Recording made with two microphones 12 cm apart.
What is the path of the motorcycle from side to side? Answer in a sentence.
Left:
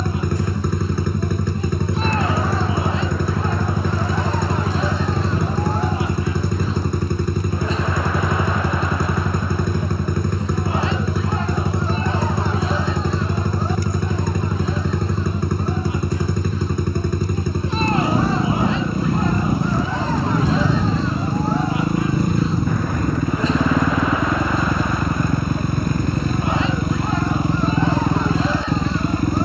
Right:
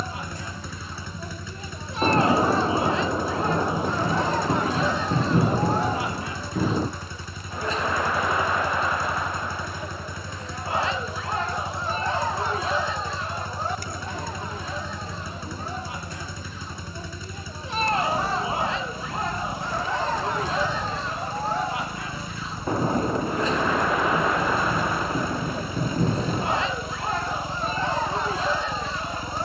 In this clip you hear the motorcycle stay put.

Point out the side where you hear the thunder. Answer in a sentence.
In this clip you hear the thunder on the right.